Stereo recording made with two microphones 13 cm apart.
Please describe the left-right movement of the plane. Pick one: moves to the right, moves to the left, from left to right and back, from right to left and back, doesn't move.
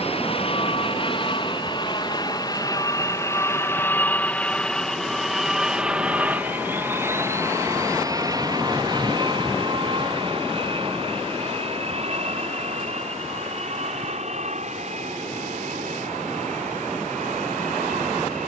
moves to the right.